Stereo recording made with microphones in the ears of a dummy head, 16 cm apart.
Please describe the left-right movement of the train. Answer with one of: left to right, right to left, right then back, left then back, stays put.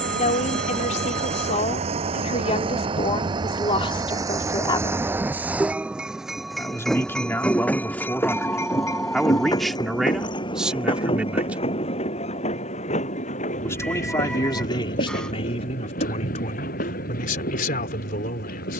right to left.